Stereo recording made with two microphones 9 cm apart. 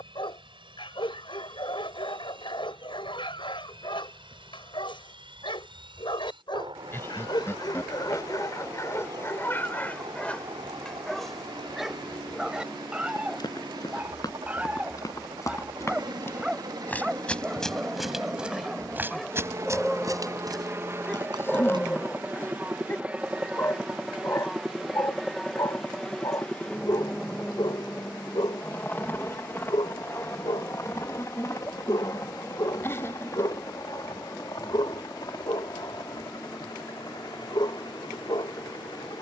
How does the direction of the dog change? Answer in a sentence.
In this clip you hear the dog go right and come back.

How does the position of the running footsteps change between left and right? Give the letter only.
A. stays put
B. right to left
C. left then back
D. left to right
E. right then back
D.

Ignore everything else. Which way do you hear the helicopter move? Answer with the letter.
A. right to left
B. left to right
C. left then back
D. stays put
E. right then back
A.